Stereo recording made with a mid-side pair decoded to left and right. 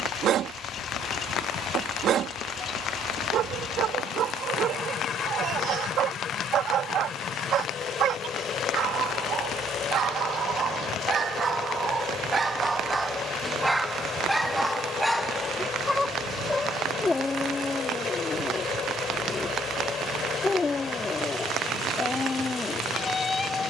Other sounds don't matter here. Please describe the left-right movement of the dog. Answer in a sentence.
You can hear the dog move to the left.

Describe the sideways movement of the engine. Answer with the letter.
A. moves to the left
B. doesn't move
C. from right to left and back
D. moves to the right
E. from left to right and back
B.